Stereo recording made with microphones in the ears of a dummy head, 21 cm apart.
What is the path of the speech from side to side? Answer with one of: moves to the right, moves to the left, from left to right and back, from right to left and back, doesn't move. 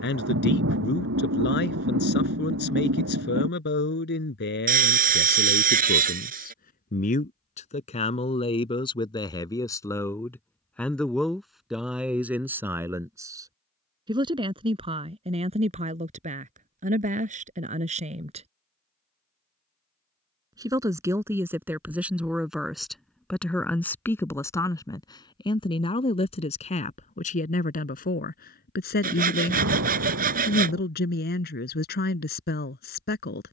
from left to right and back.